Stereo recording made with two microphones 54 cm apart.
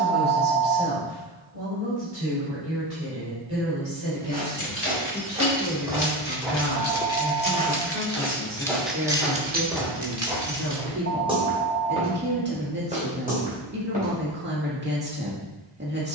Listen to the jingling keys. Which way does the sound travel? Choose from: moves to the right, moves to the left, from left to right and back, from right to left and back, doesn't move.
moves to the right.